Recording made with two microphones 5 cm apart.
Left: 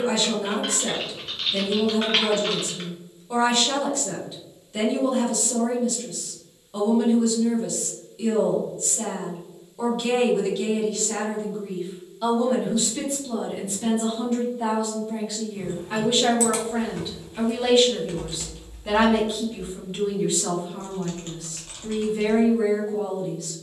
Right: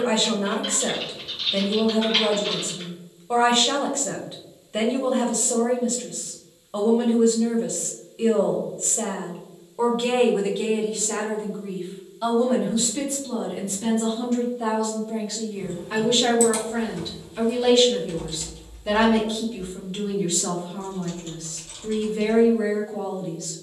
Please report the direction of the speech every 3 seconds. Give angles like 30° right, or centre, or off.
30° right, 30° right, 30° right, 20° right, 10° left, 10° left, 10° left, 10° left.